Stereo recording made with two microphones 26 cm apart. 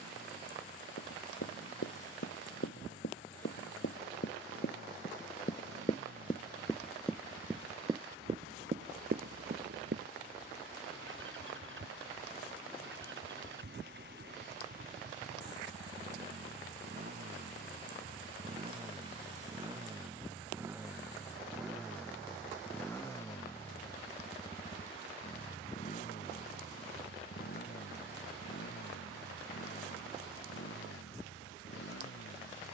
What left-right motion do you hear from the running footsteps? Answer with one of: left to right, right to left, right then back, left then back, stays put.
left to right.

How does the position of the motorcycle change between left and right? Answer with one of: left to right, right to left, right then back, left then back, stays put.
right to left.